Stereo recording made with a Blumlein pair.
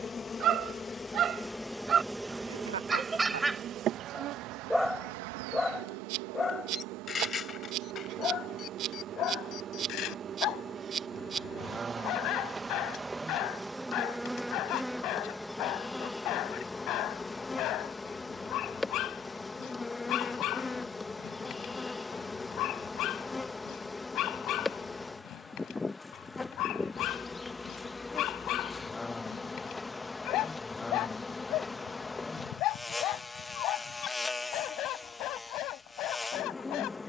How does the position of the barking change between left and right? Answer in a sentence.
In this clip you hear the barking go from the right side to the left.